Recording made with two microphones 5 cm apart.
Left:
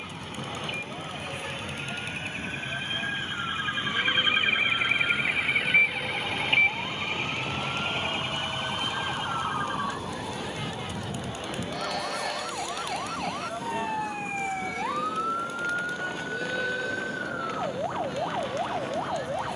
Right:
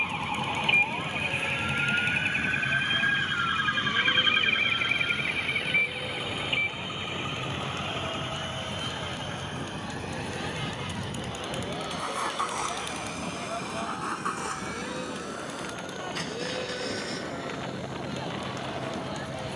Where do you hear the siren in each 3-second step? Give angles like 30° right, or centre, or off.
50° right, centre, 40° left, 60° left, 60° left, 70° left, 70° left.